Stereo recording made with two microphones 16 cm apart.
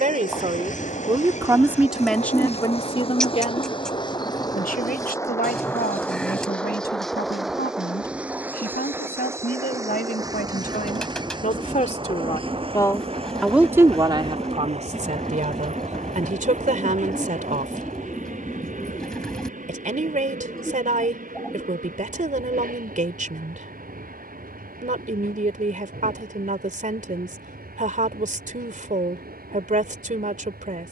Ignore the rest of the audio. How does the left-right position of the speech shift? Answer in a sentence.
In this clip you hear the speech go left and come back.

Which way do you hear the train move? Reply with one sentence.
You can hear the train move from left to right.